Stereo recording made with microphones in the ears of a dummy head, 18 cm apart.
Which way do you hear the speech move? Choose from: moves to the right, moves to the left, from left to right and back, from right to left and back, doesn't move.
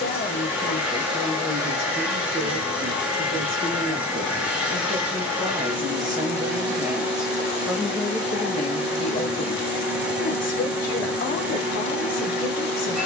from left to right and back.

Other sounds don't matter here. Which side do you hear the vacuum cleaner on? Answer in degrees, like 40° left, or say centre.
10° right.